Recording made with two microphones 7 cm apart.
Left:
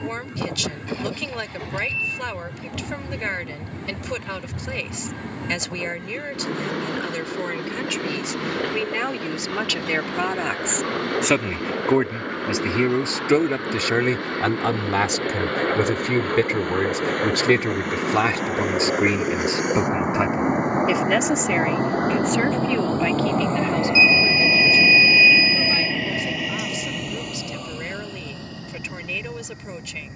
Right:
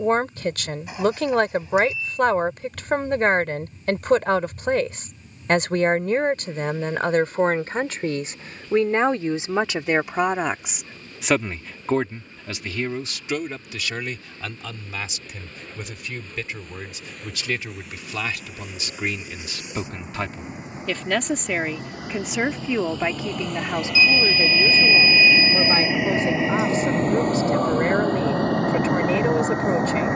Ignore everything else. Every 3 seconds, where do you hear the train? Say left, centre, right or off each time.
left, left, left, left, left, left, left, left, centre, right.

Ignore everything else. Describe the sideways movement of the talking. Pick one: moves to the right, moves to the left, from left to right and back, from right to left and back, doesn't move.
from right to left and back.